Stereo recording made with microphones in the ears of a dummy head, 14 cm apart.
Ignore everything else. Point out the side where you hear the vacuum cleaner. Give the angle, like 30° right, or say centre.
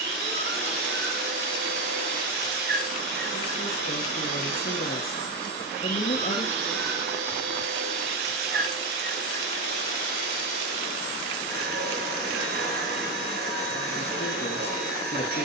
70° right.